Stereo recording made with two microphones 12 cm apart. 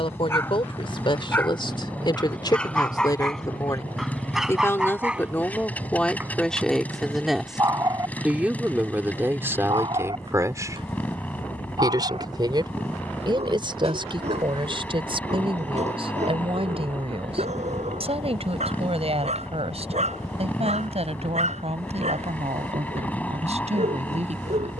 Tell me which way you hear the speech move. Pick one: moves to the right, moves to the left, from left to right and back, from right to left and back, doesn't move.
moves to the right.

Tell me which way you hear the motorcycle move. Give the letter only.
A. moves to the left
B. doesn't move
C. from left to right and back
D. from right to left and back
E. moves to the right
B.